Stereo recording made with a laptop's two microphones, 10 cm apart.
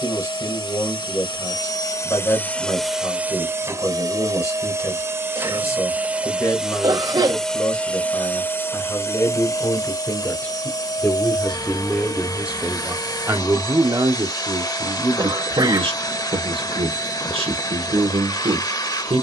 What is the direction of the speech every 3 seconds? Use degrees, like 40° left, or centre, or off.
40° left, 40° left, 30° left, 20° left, 30° right, 70° right, 70° right.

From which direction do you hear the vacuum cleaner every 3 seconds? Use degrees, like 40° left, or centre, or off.
40° left, 30° right, 10° left, 40° left, 40° left, 40° left, 40° left.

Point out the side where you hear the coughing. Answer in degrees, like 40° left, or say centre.
40° right.